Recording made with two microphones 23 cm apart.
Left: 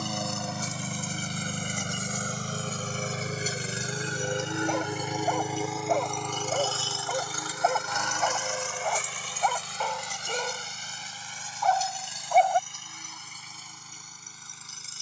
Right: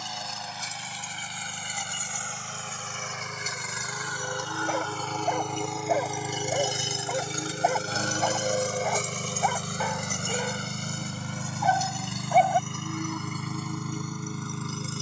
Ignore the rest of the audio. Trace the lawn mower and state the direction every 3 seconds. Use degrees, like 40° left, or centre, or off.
50° left, 20° left, 30° right, 60° right, 70° right.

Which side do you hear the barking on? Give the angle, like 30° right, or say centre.
10° right.